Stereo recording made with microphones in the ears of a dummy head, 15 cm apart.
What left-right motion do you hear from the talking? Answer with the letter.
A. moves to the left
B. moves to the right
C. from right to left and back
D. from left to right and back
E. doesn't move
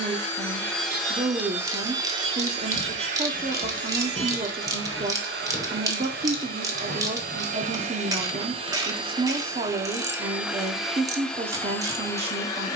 E.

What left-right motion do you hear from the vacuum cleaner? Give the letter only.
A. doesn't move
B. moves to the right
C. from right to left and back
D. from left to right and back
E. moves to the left
D.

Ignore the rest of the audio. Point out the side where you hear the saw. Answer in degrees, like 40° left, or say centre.
70° right.